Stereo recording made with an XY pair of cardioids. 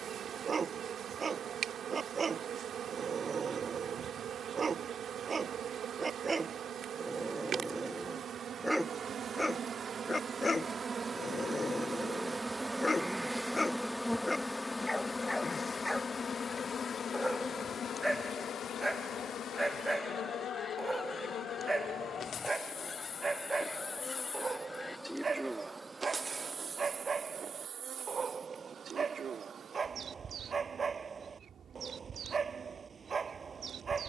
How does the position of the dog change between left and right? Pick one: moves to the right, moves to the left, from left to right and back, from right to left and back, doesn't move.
from right to left and back.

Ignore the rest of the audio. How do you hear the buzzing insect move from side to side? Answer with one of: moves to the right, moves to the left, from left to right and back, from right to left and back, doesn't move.
from right to left and back.